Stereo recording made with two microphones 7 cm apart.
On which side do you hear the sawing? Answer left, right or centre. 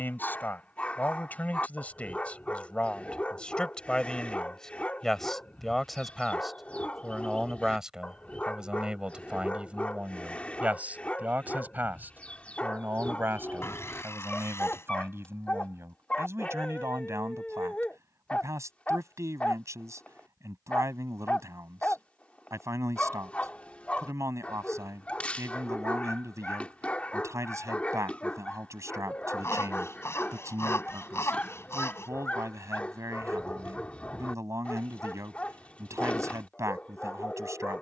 left.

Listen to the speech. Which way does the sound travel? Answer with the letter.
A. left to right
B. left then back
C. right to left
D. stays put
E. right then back
A.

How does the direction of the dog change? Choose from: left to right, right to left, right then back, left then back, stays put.
stays put.